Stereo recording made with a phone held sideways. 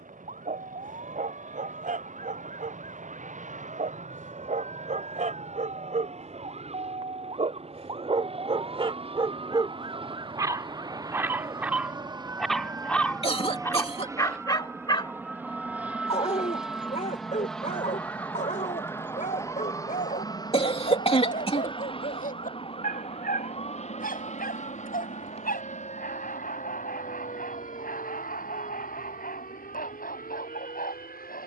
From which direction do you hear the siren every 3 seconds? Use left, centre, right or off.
right, right, right, right, centre, centre, left, left, left, left, left.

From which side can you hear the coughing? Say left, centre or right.
left.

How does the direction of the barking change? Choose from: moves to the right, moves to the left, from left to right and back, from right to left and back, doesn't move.
moves to the left.